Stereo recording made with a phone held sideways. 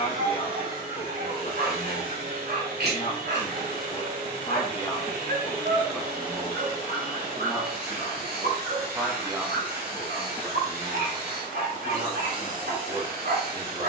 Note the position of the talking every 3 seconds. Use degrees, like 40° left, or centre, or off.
60° left, 40° left, centre, 20° right, 30° right.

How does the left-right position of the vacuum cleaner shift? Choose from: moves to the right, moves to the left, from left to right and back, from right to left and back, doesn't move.
doesn't move.